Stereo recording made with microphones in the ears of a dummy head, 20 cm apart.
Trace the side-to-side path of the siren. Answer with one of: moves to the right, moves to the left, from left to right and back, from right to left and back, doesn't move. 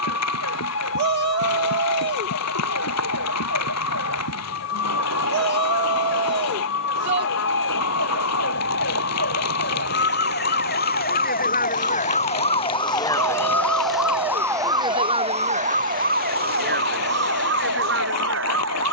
moves to the right.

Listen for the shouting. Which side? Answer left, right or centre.
right.